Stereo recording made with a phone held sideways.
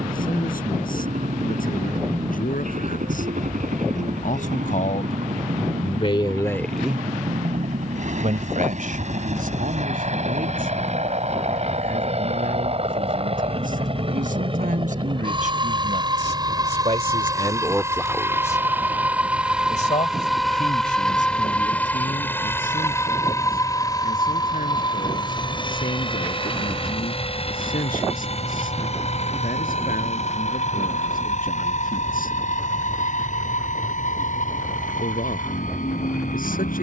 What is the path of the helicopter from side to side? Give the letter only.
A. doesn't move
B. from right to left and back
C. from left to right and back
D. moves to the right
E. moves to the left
E.